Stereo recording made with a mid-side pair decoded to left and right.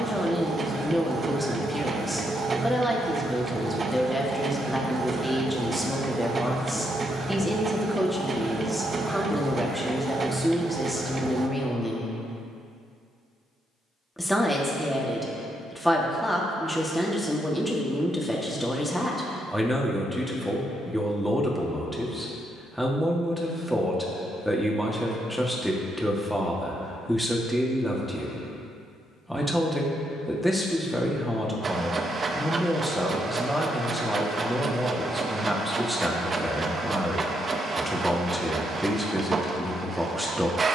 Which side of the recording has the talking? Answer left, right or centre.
centre.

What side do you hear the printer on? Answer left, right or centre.
right.